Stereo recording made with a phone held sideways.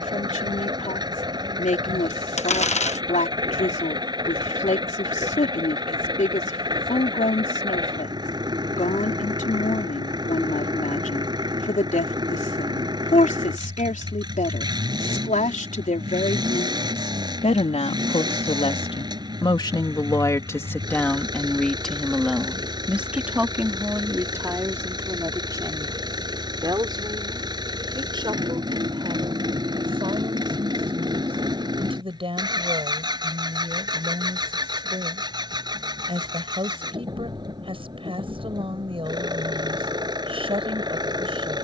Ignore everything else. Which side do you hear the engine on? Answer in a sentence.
You can hear the engine on the right.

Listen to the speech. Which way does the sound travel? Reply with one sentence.
In this clip you hear the speech move from left to right.